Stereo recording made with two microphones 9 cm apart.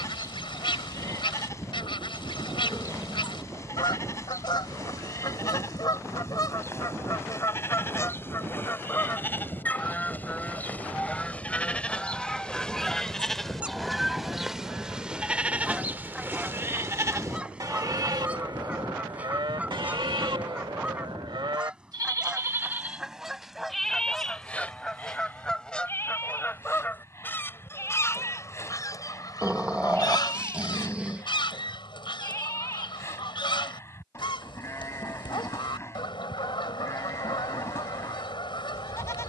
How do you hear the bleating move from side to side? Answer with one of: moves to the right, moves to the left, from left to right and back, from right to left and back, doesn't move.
from left to right and back.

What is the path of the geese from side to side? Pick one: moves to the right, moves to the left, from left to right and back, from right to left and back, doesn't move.
from left to right and back.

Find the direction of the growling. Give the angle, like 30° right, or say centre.
10° right.